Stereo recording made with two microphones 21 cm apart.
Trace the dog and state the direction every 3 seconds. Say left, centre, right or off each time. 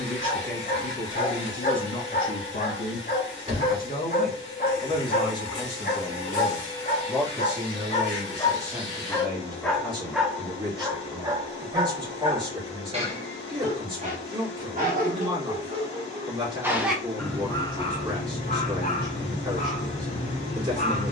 left, left, left, centre, right, centre, left.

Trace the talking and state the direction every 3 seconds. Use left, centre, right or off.
left, left, centre, right, right, right, right.